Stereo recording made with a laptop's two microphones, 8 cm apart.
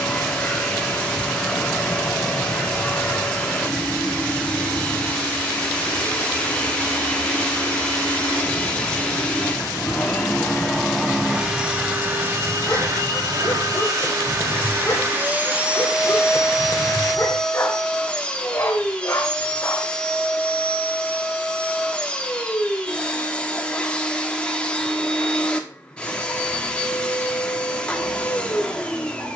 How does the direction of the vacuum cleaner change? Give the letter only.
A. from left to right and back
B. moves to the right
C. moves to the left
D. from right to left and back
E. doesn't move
A.